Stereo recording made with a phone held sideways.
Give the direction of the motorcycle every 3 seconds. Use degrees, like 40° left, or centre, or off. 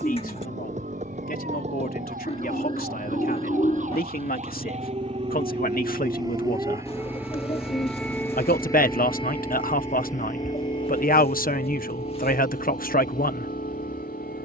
50° right, 30° right, 10° right, 20° left, 50° left.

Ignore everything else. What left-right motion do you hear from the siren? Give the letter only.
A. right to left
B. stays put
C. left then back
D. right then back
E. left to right
A.